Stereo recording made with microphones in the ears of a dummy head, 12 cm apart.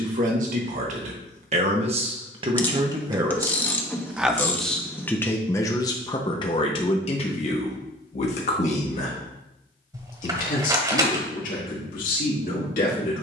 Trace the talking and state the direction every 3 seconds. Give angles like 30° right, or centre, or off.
50° right, centre, 50° left, 60° left, 70° left.